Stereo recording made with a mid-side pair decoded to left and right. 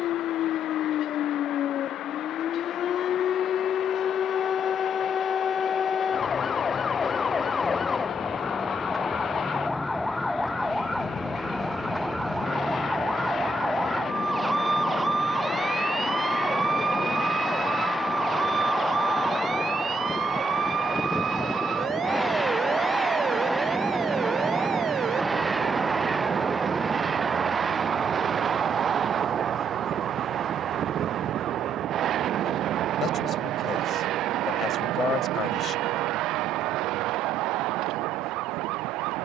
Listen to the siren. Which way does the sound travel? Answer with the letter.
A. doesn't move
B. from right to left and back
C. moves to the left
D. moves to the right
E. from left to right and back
D.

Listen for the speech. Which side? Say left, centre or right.
left.